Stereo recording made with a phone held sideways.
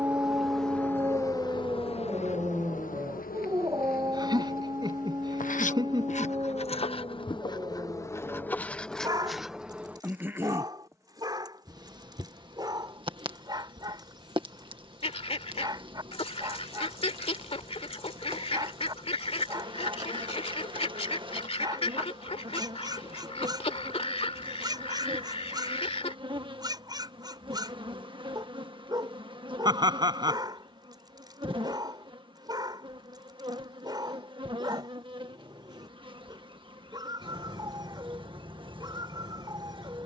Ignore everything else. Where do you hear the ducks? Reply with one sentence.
In this clip you hear the ducks on the left.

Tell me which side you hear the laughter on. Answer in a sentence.
You can hear the laughter on the right.